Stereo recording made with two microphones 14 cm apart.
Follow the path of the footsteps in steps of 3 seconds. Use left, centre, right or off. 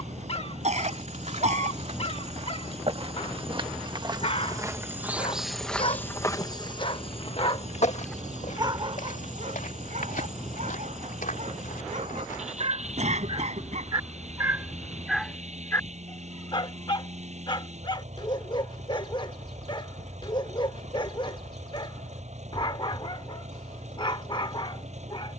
right, right, left, left, left, off, off, off, off.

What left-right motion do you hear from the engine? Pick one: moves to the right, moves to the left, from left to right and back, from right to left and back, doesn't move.
doesn't move.